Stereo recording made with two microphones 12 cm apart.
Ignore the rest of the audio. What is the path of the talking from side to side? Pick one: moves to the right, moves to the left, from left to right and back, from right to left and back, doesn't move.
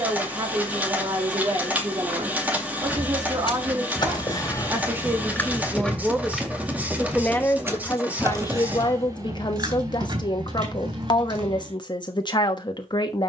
moves to the left.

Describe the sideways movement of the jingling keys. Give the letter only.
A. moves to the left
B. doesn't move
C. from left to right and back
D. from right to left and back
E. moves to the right
E.